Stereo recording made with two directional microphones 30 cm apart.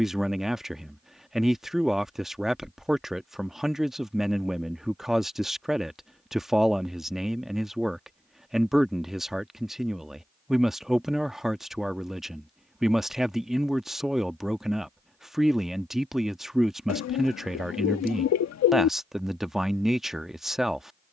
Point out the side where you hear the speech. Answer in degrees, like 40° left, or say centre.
centre.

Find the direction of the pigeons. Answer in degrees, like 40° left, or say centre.
60° left.